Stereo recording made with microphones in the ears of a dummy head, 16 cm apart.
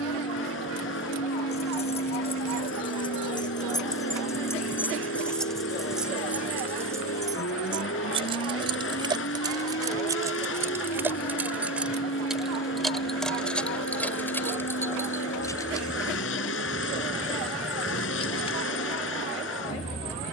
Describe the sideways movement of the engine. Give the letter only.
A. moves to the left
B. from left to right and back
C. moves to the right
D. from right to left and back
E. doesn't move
E.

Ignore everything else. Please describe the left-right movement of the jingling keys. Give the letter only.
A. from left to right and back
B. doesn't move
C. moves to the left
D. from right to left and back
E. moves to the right
A.